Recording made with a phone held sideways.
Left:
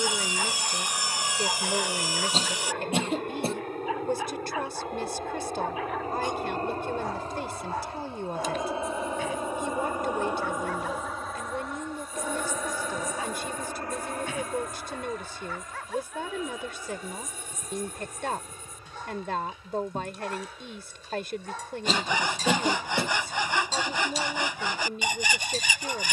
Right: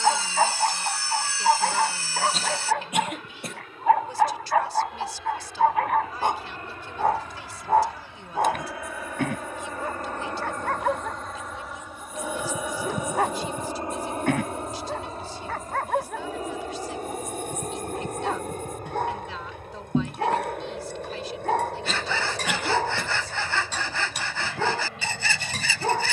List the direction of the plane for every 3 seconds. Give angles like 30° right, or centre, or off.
60° left, 50° left, 30° left, 10° left, 20° right, 40° right, 50° right, 60° right, 60° right.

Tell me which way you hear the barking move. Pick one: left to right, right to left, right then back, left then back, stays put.
stays put.